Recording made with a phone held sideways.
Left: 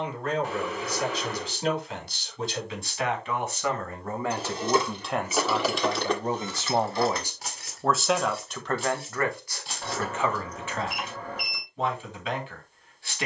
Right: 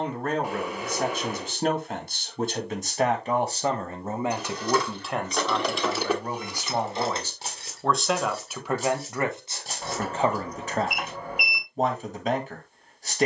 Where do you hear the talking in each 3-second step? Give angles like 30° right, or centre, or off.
50° right, 10° right, 10° left, 30° right, 40° right.